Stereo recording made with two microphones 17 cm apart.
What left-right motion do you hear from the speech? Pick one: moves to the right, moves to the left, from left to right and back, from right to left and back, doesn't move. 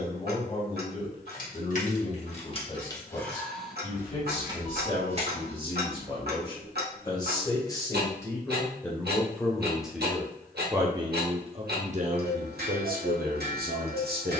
moves to the right.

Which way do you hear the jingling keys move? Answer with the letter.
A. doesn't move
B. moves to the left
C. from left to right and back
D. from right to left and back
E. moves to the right
E.